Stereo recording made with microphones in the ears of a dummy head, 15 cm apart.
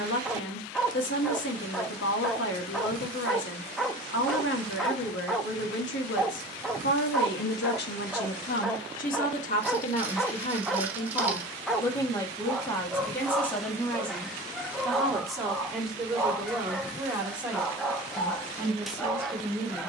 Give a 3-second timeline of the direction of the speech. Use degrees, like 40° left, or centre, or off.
80° left, 80° left, 70° left, 40° left, 10° left, centre, 10° right.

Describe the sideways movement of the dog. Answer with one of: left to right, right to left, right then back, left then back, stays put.
stays put.